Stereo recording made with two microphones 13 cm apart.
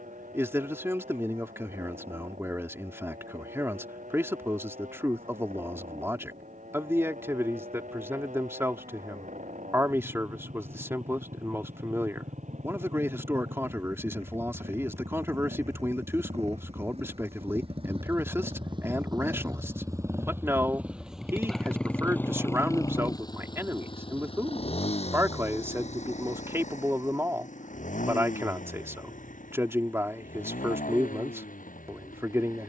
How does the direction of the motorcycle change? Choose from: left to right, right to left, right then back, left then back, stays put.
right to left.